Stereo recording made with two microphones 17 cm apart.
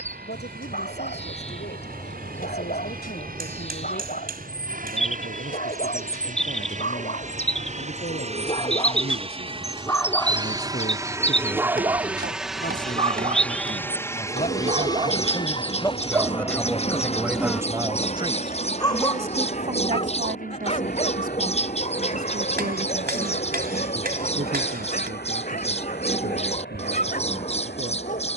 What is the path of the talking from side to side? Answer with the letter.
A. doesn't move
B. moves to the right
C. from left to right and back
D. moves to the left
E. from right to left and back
B.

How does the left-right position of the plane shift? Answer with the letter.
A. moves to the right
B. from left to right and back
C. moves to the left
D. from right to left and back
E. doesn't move
C.